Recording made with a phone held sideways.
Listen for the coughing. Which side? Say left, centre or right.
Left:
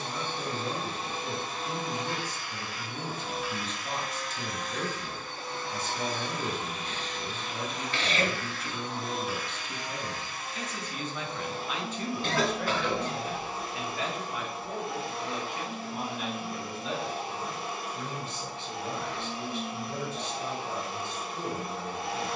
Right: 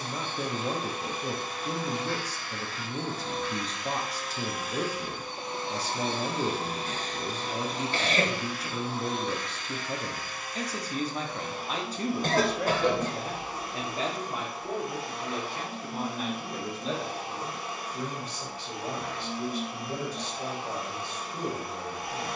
right.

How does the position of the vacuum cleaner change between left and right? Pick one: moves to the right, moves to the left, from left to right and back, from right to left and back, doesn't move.
from left to right and back.